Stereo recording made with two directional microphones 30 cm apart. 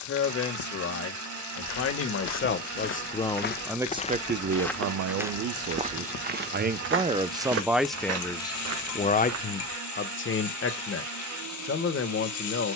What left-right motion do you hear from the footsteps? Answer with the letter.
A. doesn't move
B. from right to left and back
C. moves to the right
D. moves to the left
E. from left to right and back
C.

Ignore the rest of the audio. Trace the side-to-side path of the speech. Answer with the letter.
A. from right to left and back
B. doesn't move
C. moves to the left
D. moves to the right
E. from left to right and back
E.